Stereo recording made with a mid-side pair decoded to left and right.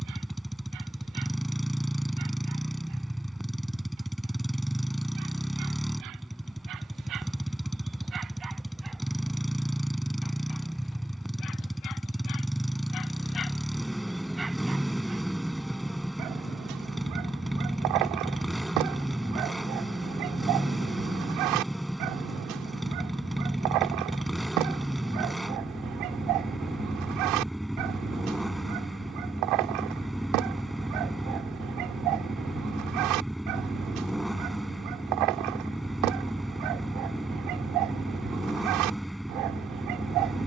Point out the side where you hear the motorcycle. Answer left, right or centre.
centre.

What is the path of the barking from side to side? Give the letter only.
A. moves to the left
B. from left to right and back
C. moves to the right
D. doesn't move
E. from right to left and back
E.